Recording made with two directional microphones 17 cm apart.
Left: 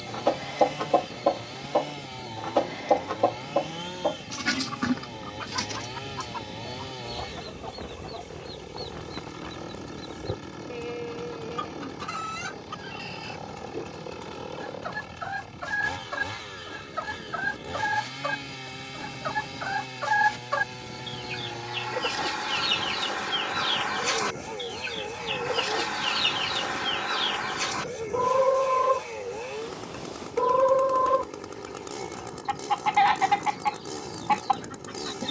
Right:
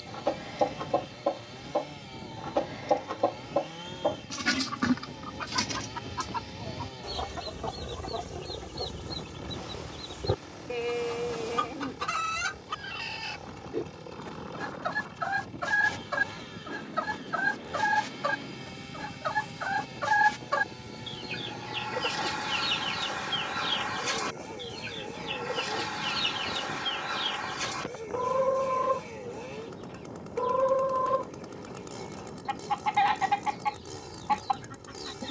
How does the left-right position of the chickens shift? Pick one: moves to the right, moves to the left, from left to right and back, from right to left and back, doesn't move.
from left to right and back.